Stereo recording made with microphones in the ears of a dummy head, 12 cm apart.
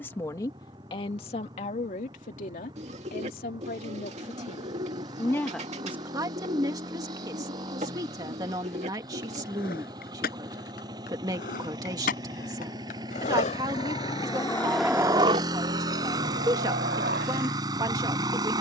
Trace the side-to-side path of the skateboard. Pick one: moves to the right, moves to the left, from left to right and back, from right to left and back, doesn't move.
moves to the right.